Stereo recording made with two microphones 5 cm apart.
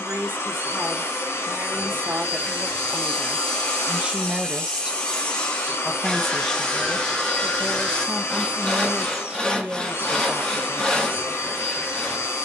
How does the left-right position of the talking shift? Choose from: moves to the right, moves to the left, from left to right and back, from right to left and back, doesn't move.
from right to left and back.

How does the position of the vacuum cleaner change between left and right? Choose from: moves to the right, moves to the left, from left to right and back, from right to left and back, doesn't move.
doesn't move.